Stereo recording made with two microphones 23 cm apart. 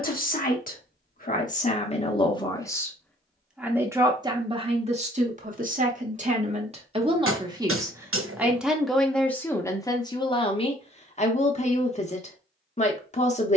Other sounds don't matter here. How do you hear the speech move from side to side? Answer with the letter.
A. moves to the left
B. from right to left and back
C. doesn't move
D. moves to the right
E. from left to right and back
E.